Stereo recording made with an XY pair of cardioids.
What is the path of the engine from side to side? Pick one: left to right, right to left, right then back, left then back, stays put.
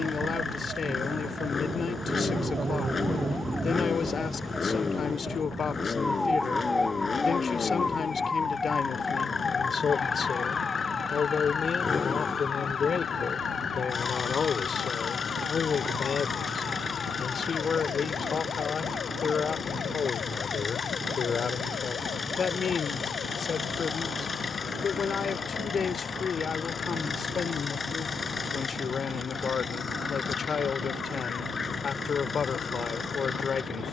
stays put.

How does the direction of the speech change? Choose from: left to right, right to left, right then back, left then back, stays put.
stays put.